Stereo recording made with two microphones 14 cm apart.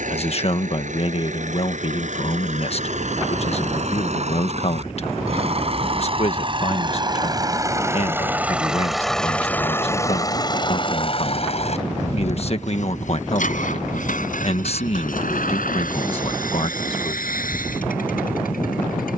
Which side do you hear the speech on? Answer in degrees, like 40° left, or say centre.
50° left.